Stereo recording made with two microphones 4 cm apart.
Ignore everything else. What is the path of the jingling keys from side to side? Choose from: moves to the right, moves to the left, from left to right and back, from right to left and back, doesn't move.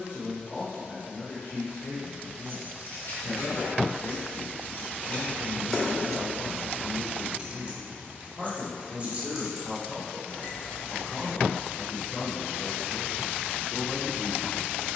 from left to right and back.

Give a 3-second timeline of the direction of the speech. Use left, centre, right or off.
left, left, left, centre, left.